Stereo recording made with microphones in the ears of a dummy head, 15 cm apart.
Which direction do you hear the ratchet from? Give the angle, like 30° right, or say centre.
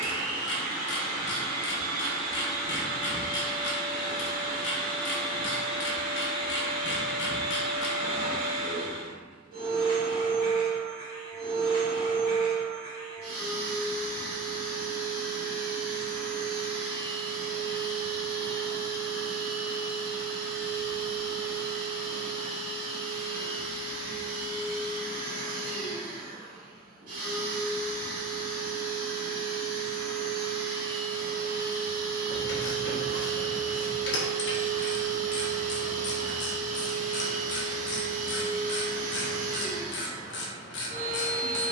70° left.